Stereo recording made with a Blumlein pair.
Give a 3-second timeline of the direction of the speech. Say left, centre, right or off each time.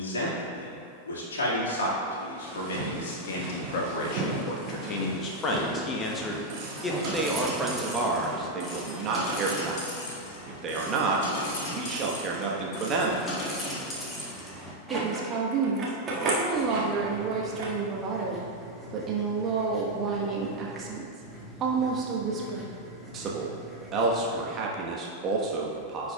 left, left, centre, right, right, right, right, right, right.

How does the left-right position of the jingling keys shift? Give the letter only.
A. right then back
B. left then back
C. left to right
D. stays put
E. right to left
B.